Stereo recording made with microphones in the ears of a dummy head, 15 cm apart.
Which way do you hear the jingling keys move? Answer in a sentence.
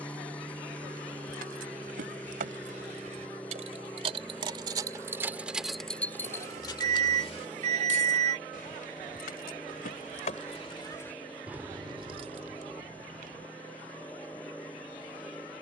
In this clip you hear the jingling keys go left and come back.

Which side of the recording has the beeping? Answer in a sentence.
You can hear the beeping on the right.